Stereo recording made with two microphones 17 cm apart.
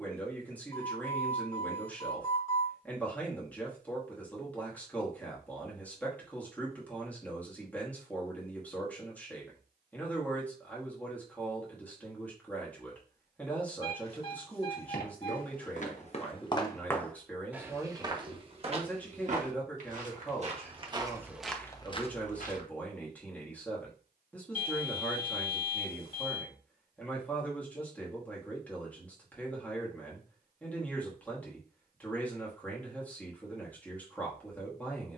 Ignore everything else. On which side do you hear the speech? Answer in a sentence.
In this clip you hear the speech in the centre.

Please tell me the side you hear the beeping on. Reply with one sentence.
You can hear the beeping on the left.